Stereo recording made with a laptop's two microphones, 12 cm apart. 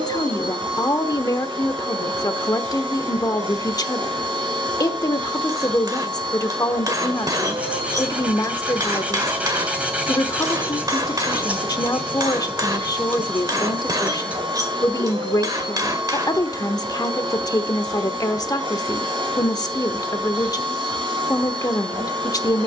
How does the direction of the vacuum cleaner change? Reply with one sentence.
You can hear the vacuum cleaner stay put.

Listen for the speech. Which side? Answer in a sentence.
You can hear the speech on the left.